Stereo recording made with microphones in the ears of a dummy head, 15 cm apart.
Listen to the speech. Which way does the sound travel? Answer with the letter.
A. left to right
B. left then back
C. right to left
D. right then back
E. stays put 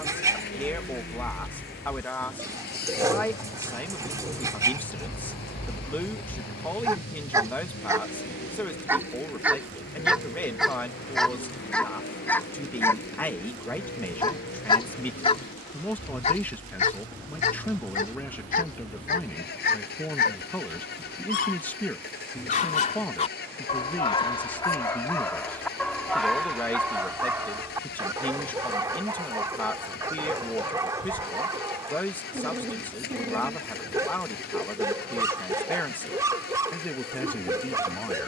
E.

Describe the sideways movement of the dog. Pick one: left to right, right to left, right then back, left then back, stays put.
left then back.